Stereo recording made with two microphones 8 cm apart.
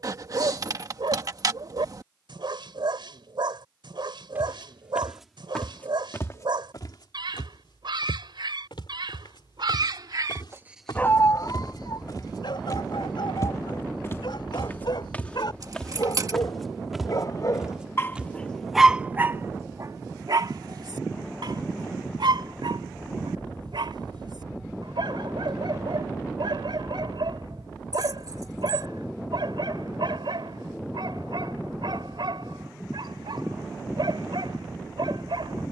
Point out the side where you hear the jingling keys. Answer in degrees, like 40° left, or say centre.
50° right.